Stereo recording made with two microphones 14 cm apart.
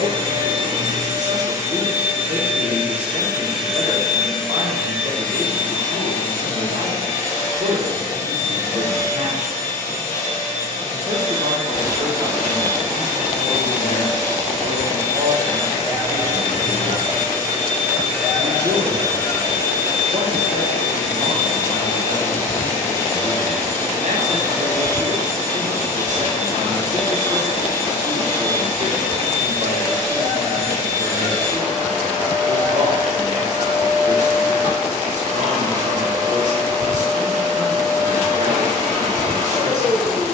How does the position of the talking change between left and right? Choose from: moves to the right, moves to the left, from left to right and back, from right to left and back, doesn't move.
doesn't move.